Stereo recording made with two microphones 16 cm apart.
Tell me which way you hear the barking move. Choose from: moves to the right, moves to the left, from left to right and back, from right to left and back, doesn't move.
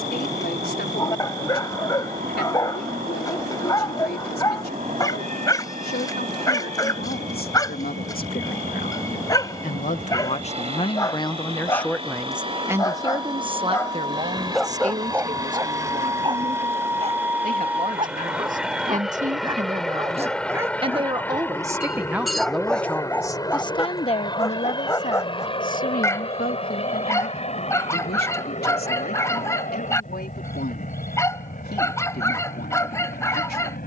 from left to right and back.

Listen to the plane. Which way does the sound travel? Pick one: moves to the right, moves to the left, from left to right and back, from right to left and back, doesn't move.
moves to the left.